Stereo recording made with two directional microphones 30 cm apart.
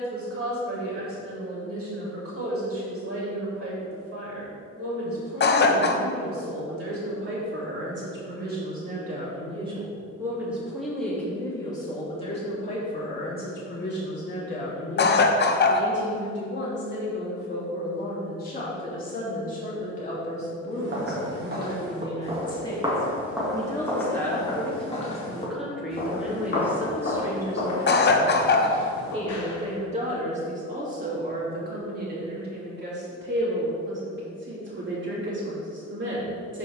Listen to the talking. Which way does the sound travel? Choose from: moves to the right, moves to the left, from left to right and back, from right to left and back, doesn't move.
from right to left and back.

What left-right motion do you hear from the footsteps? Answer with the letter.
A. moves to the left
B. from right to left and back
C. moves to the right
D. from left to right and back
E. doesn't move
A.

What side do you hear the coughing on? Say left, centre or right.
left.